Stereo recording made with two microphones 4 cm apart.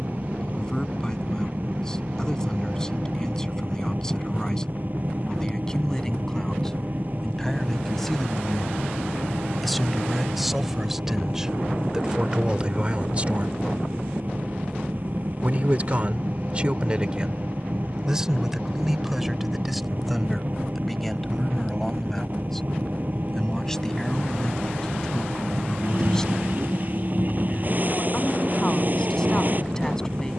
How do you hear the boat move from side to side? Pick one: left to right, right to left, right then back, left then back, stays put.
stays put.